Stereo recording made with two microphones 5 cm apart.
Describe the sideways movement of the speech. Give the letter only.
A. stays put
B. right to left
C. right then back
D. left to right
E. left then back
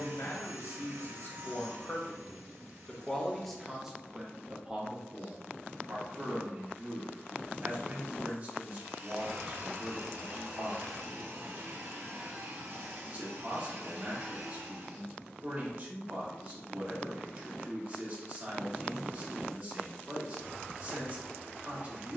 D.